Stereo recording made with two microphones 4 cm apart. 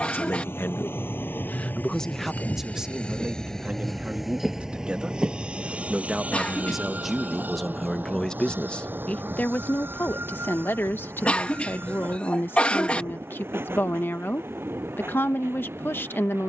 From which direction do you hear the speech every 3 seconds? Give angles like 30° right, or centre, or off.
30° left, 30° right, centre, 50° left, 60° left, 60° left.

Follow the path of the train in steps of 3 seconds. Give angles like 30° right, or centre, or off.
50° left, 10° right, 50° right, 60° right, 60° right, 70° right.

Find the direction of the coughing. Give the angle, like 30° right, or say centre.
30° left.